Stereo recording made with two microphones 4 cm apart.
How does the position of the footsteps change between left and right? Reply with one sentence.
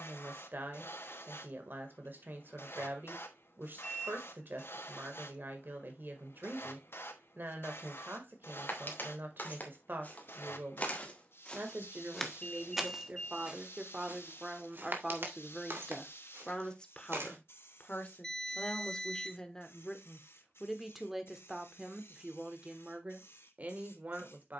You can hear the footsteps move from left to right.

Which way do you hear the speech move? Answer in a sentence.
You can hear the speech go left and come back.